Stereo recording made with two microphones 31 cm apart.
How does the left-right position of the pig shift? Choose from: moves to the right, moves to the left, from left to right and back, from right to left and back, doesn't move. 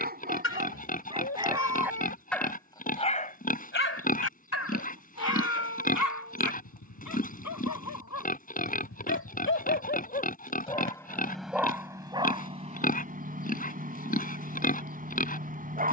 doesn't move.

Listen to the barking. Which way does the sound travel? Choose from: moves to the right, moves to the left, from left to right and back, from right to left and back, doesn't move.
from right to left and back.